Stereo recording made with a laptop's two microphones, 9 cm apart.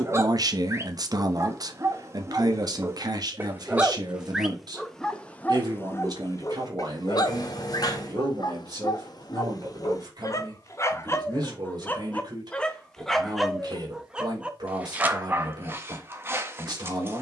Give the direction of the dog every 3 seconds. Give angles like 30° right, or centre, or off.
30° right, centre, 50° left, 40° left, centre, 30° right.